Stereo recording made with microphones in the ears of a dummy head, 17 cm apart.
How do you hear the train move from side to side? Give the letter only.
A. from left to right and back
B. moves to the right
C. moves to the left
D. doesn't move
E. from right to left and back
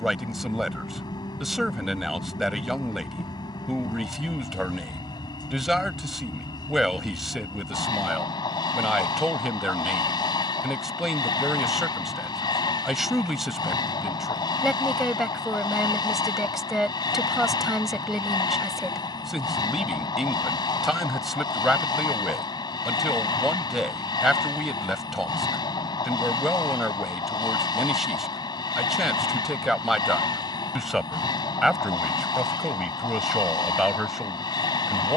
D.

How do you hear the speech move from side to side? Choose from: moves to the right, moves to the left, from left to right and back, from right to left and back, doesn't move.
doesn't move.